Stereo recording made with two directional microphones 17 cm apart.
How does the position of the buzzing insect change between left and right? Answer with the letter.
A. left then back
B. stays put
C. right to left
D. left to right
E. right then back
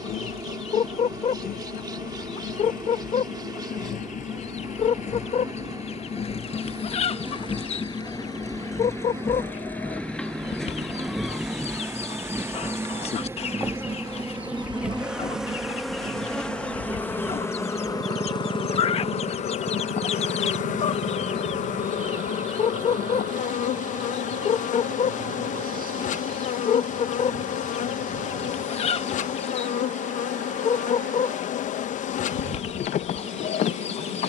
C.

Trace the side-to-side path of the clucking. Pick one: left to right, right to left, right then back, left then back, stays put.
stays put.